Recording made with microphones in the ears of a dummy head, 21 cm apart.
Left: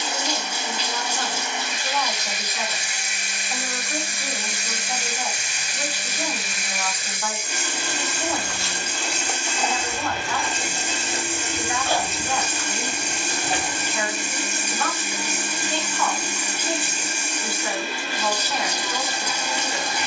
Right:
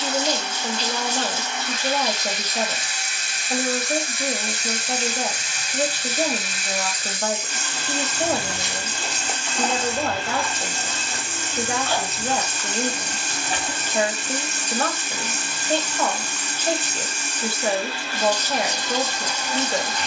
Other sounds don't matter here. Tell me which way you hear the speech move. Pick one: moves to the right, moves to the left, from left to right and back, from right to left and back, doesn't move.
doesn't move.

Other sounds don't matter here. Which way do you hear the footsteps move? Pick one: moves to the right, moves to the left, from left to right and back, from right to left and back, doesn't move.
moves to the left.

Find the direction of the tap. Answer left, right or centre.
centre.